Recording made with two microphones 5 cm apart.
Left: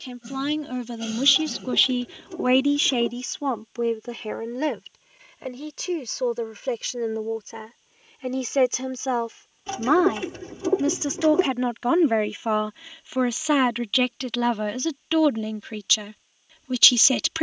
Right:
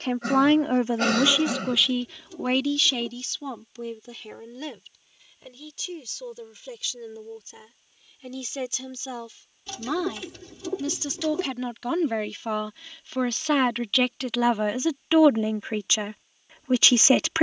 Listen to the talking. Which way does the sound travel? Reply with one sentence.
You can hear the talking move from right to left and back again.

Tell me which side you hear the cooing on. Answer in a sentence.
You can hear the cooing on the left.